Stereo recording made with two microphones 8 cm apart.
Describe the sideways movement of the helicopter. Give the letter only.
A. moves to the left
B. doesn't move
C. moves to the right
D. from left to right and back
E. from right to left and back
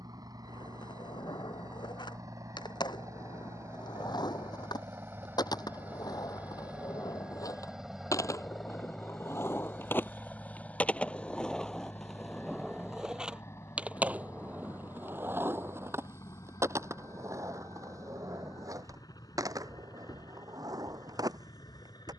A.